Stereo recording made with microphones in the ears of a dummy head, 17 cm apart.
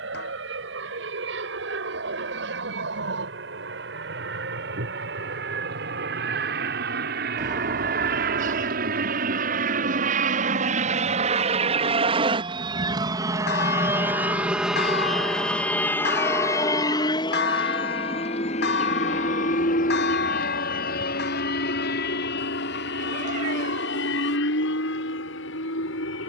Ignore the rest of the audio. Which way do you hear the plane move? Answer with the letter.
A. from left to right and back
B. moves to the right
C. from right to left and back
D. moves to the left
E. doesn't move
D.